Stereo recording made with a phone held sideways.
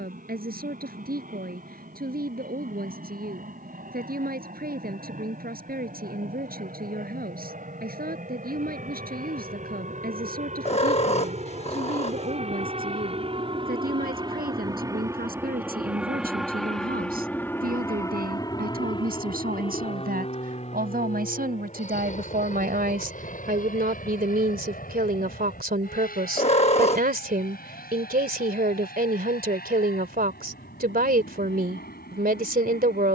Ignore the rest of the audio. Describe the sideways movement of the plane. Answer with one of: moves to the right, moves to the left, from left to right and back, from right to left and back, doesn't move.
moves to the left.